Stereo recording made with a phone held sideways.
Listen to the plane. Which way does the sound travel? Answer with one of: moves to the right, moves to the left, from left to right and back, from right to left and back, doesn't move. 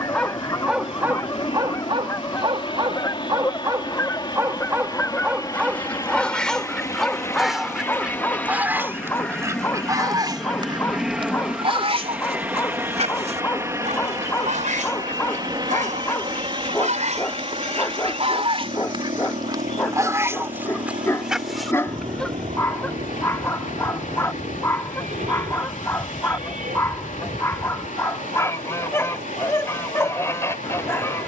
moves to the right.